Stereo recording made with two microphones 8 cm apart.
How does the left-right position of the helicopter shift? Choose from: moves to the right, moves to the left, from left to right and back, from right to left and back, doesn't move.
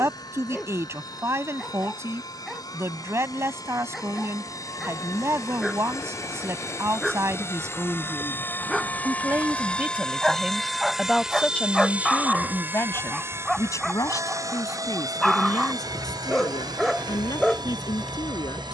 moves to the right.